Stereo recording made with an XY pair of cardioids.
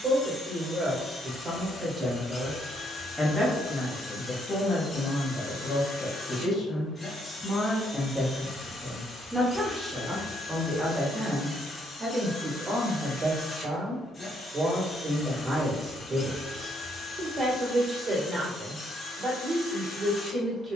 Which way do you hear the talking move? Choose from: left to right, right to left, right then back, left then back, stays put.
left then back.